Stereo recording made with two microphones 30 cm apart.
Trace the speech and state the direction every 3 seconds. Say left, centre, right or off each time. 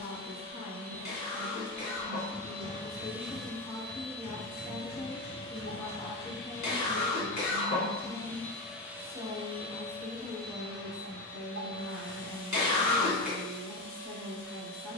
left, left, centre, right, right.